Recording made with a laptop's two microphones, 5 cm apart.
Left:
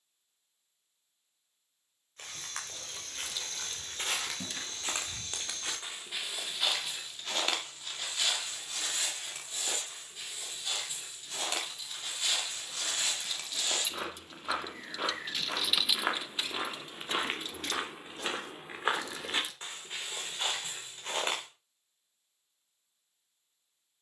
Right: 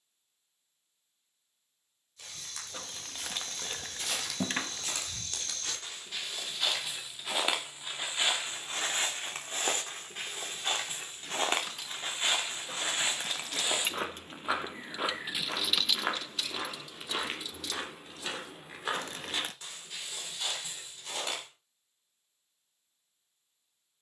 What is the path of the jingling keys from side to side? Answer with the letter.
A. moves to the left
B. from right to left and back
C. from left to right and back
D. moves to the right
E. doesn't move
A.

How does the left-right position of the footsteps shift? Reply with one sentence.
You can hear the footsteps move from left to right and back again.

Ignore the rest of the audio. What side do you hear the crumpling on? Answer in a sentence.
In this clip you hear the crumpling on the right.